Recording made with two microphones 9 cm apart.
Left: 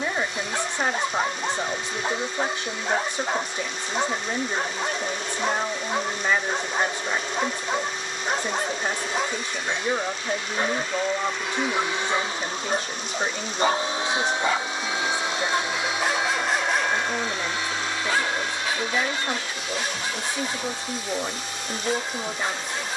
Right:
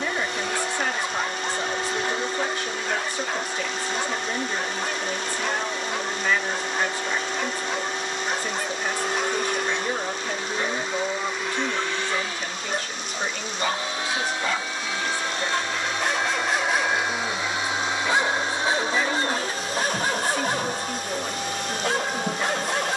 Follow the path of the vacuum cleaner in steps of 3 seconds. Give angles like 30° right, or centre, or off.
70° right, 70° right, 70° right, 30° right, 30° left, centre, 40° right, 60° right.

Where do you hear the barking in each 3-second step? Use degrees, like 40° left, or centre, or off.
30° left, 30° left, 30° left, 30° left, 30° left, centre, 40° right, 70° right.